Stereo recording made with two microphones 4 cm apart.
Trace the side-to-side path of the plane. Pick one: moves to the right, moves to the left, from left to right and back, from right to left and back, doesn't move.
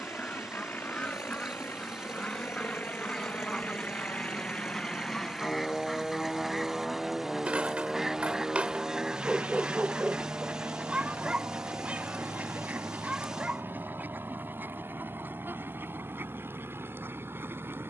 moves to the right.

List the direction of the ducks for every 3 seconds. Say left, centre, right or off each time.
left, centre, centre, right, right, right.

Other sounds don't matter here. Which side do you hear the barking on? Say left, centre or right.
right.